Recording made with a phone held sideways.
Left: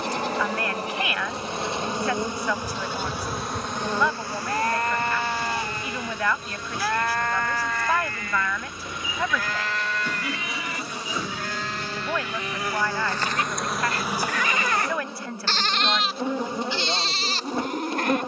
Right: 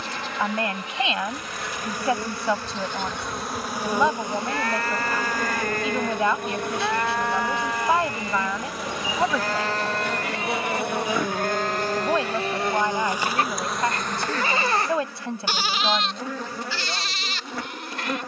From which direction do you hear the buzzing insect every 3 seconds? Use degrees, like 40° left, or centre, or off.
30° left, 20° right, 70° right, 60° right, 10° right, 20° left.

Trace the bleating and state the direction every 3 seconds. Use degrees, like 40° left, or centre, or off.
50° left, 30° left, 10° right, 40° right, 40° right, 20° left.